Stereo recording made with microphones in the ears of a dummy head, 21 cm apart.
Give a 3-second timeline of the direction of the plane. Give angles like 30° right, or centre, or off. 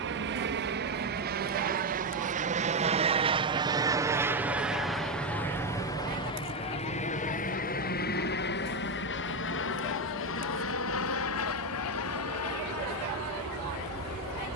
40° right, 10° right, 30° left, 60° left, 70° left.